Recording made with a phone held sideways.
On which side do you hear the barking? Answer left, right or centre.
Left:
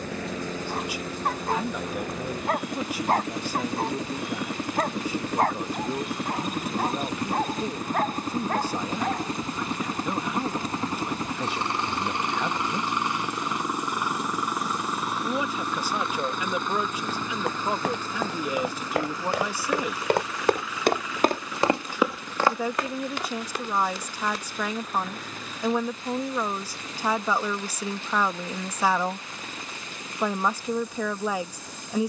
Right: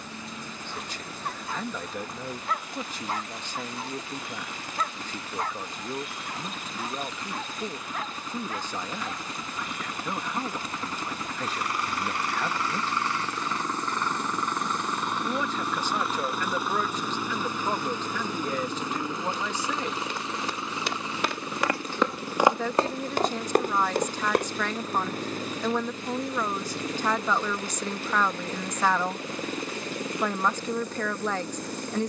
left.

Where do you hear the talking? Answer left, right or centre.
centre.